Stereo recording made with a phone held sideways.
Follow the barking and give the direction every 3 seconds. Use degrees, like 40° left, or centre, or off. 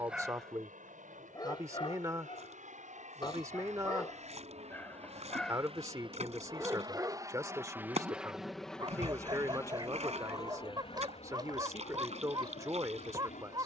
20° left, 20° left, 20° right, 30° right, 30° right.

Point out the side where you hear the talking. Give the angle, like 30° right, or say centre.
20° right.